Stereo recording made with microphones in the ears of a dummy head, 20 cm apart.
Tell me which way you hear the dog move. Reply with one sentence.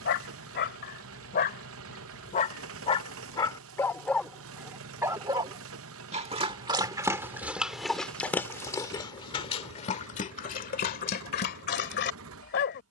You can hear the dog go right and come back.